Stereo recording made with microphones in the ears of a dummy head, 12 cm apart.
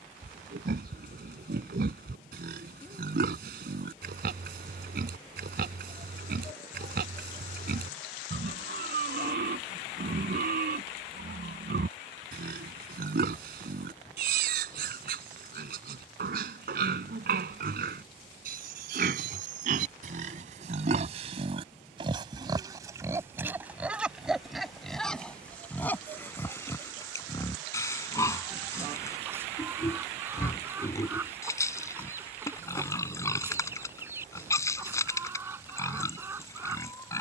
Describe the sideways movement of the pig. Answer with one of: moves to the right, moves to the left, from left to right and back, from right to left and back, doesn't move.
moves to the left.